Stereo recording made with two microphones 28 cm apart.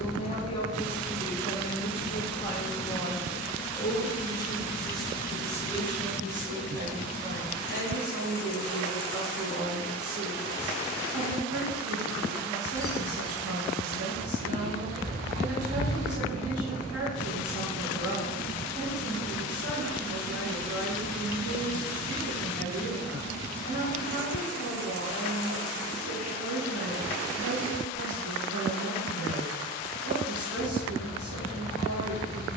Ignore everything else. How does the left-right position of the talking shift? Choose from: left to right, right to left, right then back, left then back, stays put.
left to right.